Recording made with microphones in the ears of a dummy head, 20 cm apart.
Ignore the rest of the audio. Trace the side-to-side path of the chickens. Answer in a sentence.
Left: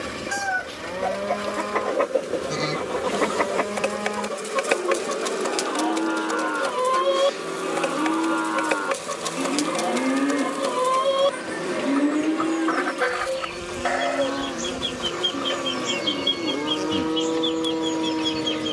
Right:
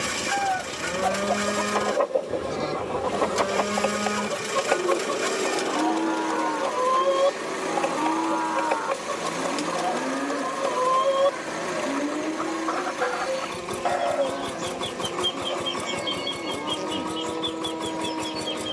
In this clip you hear the chickens stay in one place.